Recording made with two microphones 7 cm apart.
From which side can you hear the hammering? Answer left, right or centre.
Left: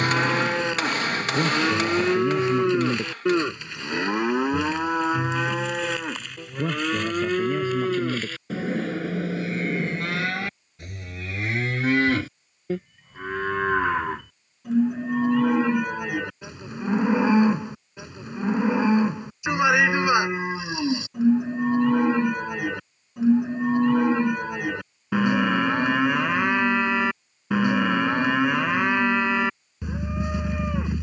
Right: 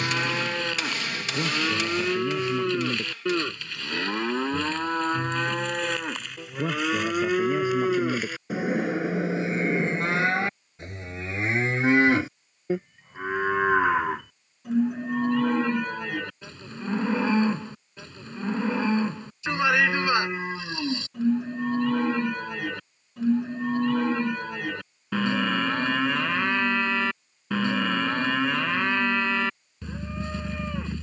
left.